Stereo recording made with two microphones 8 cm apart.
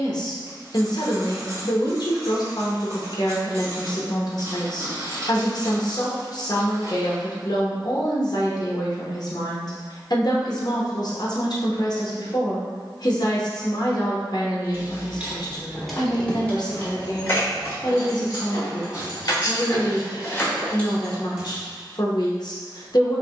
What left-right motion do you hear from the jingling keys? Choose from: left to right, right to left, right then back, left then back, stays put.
left then back.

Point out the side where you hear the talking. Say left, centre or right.
left.